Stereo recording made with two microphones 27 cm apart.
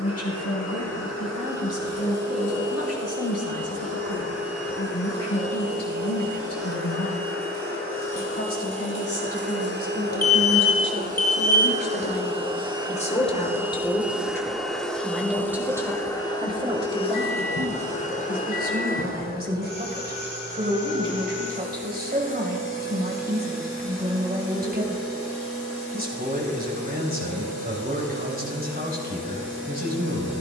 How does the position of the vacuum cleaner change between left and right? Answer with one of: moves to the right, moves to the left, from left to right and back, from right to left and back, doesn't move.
moves to the left.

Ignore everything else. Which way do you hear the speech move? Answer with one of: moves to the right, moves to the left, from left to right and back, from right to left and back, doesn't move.
moves to the right.